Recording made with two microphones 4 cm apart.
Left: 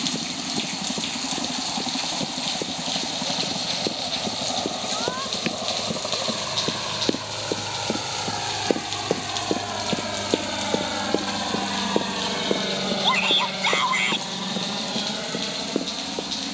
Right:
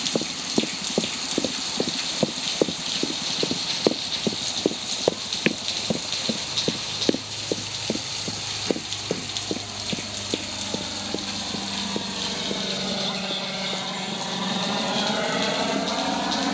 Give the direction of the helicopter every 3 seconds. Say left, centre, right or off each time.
left, left, left, left, centre, right.